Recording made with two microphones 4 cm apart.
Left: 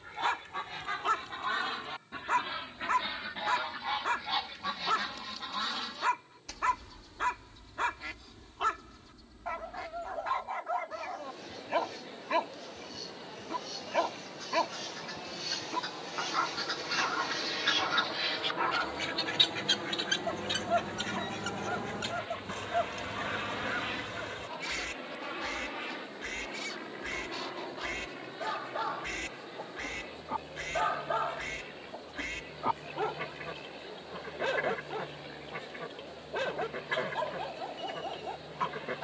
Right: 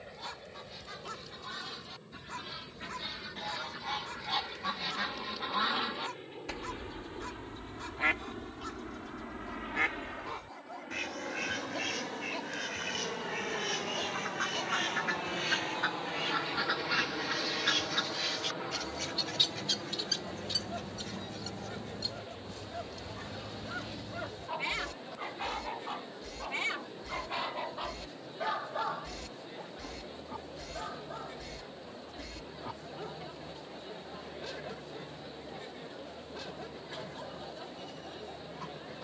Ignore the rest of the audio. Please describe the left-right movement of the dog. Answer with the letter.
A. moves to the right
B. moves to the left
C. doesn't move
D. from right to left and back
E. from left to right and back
E.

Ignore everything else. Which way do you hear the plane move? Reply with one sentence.
You can hear the plane move from right to left.